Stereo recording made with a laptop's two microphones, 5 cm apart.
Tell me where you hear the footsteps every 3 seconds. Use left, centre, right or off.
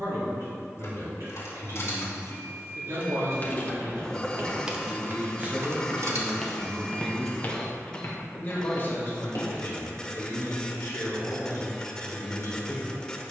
off, right, left, left, off.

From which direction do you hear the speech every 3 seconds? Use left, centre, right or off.
right, right, centre, left, left.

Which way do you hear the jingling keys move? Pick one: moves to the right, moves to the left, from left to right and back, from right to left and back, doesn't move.
moves to the right.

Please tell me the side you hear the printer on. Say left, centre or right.
centre.